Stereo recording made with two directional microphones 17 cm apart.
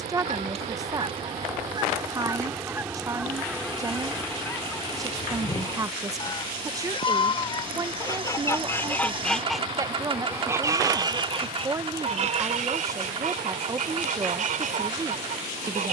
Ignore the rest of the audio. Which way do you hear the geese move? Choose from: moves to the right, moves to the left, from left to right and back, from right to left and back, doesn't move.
from right to left and back.